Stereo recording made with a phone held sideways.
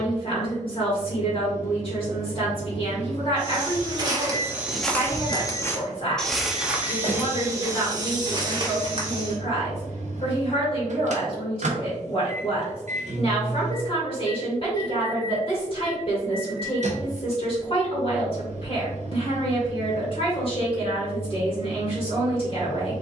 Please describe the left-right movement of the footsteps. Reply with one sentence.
In this clip you hear the footsteps move from right to left and back again.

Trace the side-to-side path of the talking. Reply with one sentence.
You can hear the talking stay in one place.